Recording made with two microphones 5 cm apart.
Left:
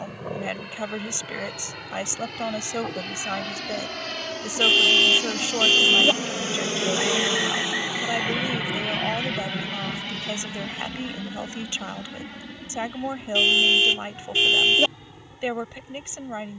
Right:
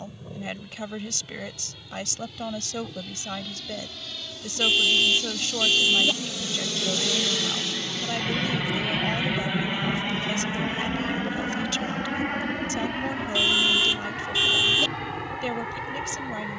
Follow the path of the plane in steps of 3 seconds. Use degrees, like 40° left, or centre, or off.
70° left, 60° left, 20° left, 30° right, 50° right, 60° right.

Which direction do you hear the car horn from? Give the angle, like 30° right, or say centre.
40° left.